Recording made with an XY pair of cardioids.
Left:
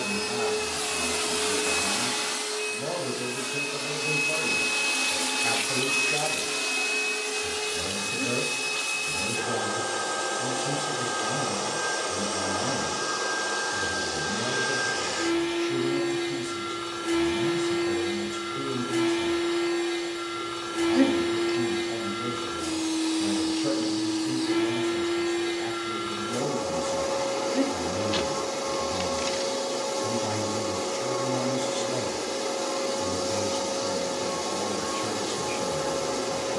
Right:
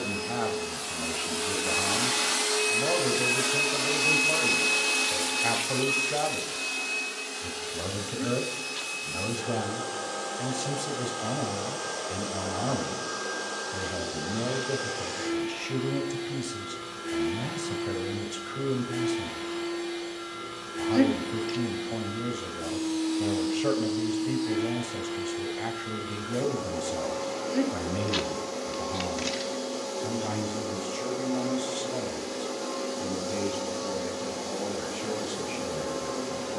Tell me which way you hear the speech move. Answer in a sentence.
In this clip you hear the speech travel towards the left.